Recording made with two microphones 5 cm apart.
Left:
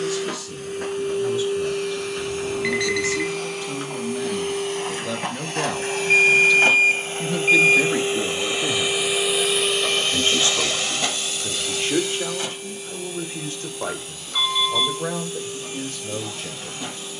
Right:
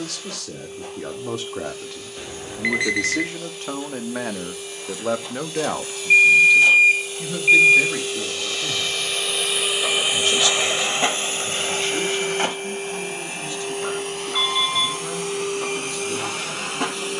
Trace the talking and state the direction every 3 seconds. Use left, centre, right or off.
right, right, centre, left, left, left.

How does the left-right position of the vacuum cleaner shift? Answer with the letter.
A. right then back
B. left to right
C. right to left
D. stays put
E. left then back
B.